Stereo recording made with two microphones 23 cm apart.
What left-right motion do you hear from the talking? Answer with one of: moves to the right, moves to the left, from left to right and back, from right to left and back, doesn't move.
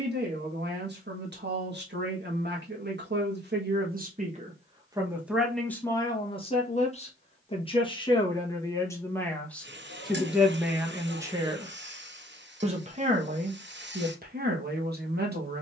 from right to left and back.